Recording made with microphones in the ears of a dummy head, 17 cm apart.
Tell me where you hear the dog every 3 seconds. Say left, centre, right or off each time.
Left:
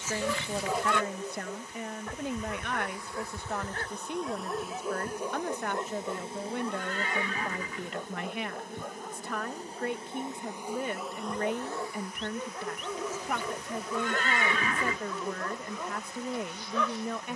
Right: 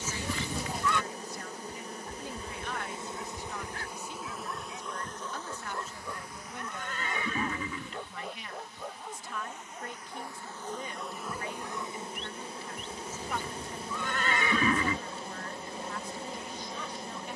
left, left, centre, centre, left, left.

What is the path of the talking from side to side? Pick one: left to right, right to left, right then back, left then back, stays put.
stays put.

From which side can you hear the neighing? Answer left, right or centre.
right.